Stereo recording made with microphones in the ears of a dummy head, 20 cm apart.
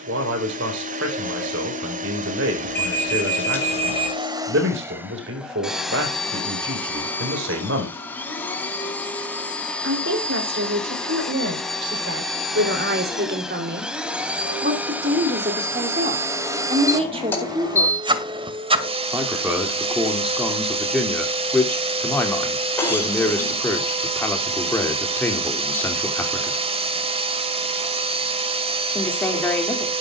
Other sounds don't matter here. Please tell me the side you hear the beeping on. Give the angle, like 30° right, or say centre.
10° left.